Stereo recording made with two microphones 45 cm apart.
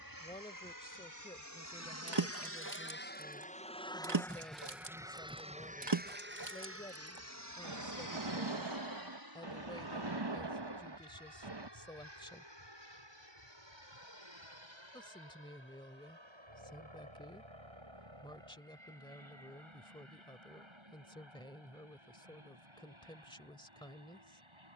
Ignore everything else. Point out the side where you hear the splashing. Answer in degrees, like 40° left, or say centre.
60° right.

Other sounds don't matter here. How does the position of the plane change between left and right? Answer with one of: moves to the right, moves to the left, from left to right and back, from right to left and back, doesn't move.
moves to the right.